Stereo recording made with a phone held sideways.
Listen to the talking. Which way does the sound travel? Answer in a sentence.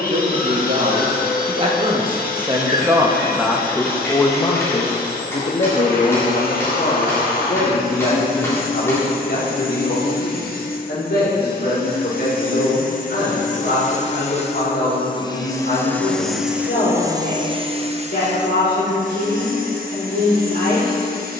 You can hear the talking travel towards the left.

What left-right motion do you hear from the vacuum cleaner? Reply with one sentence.
You can hear the vacuum cleaner move to the right.